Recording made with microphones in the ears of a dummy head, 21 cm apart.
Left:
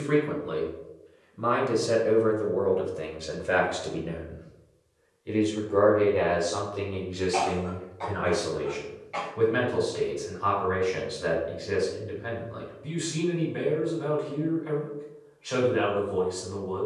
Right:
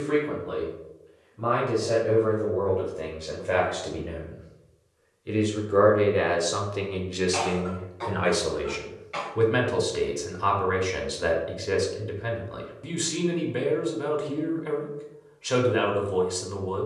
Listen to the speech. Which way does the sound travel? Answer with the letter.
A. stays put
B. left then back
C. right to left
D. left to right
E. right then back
D.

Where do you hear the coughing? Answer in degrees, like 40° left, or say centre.
20° right.